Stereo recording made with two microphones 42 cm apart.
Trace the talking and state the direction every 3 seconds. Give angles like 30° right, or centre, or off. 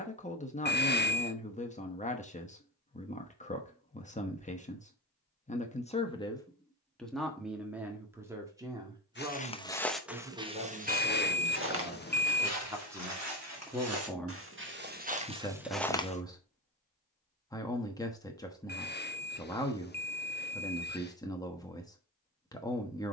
20° left, 20° left, centre, 10° right, centre, 10° left, 10° left, 10° left.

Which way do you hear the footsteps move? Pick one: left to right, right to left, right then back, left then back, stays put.
right then back.